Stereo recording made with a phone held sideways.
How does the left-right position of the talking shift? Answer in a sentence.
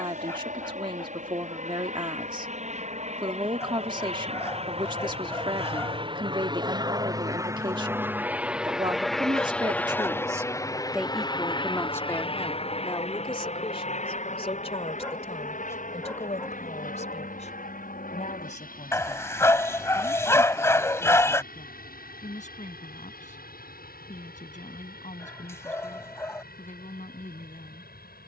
In this clip you hear the talking go from the right side to the left.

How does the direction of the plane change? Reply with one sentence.
In this clip you hear the plane move from right to left.